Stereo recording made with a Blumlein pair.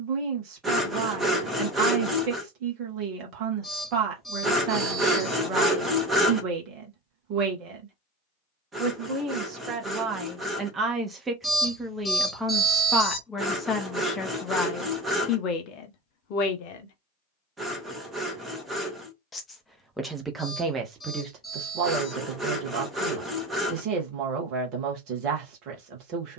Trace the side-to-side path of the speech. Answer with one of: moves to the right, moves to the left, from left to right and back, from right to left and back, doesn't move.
from right to left and back.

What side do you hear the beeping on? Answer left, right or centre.
centre.